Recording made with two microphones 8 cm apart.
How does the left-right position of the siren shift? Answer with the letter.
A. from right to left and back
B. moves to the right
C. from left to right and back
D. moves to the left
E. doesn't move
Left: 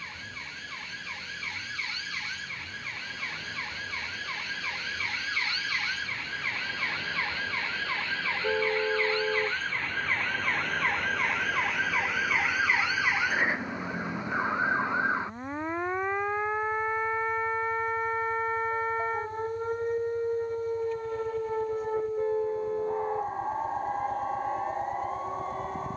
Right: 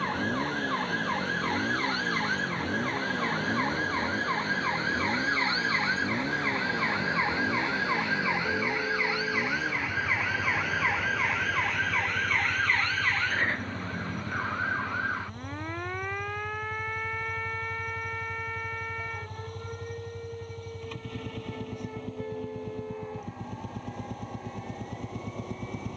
D.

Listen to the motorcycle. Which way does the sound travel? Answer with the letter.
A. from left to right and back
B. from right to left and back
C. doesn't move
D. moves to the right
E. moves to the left
C.